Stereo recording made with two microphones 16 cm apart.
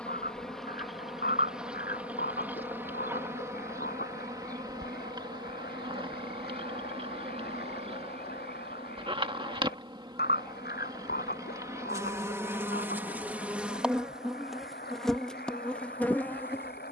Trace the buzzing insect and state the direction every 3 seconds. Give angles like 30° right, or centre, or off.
centre, 20° right, 40° right, 30° right, 10° right, 10° left.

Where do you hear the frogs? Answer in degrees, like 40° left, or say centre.
80° left.